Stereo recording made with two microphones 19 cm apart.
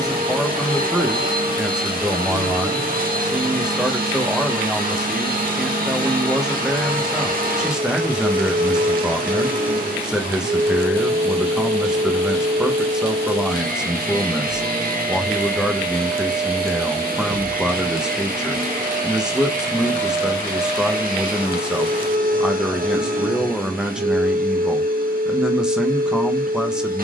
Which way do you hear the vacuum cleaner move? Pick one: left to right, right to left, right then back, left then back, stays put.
stays put.